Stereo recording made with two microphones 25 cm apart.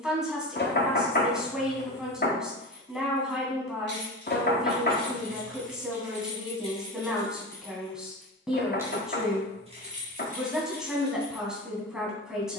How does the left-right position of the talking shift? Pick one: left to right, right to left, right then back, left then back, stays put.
stays put.